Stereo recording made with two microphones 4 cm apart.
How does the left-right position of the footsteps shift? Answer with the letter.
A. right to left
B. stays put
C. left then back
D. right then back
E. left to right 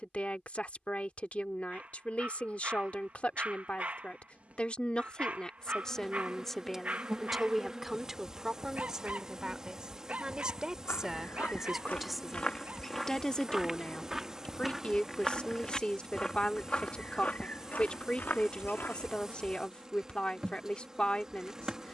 D.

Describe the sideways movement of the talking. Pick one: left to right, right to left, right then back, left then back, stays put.
right then back.